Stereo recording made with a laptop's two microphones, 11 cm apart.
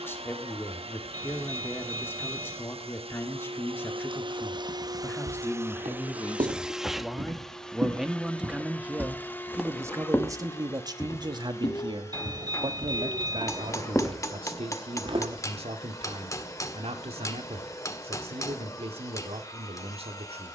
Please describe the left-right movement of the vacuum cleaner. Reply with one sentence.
You can hear the vacuum cleaner go from the right side to the left.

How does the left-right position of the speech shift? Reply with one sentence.
In this clip you hear the speech travel towards the right.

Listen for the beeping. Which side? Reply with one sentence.
In this clip you hear the beeping on the right.